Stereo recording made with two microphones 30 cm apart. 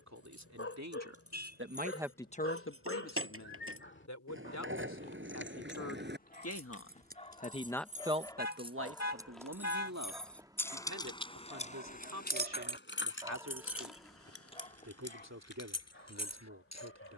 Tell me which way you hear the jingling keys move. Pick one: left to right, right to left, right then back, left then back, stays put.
right to left.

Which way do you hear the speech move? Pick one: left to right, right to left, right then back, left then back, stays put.
left then back.